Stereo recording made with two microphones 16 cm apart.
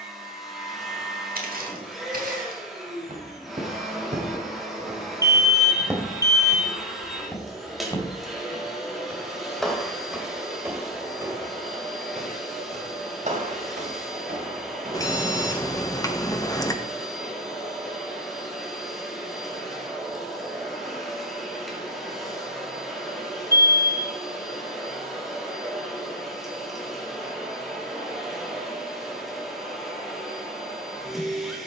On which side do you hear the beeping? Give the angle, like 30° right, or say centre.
20° left.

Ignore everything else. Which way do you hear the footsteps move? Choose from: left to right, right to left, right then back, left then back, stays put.
left then back.